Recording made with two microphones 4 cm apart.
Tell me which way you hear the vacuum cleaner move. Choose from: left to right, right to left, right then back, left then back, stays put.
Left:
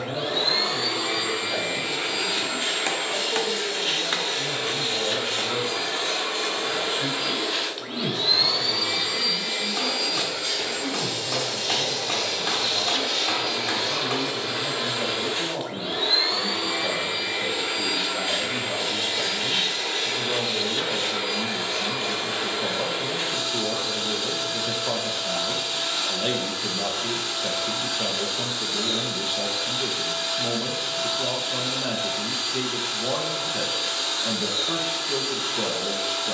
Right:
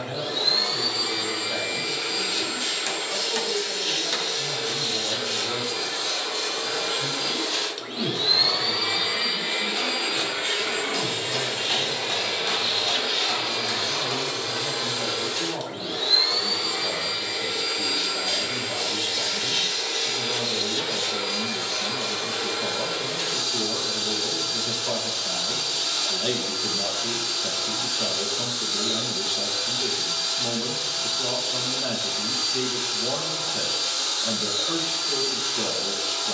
right then back.